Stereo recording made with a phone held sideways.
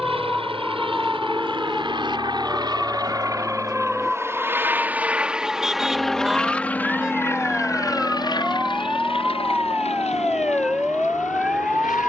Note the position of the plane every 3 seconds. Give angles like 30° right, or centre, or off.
40° right, 20° right, 20° left, 50° left.